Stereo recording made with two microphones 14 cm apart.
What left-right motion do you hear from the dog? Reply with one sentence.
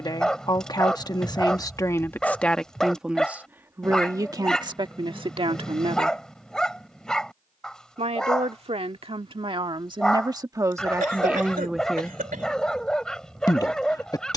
In this clip you hear the dog stay in one place.